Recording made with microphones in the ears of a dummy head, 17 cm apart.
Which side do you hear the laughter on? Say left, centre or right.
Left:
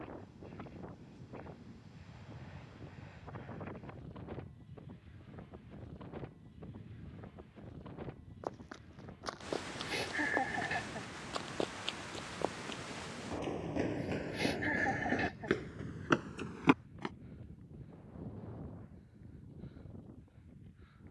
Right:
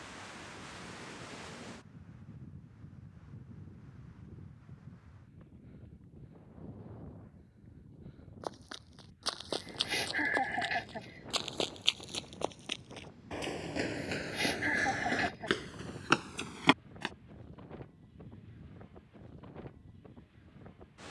right.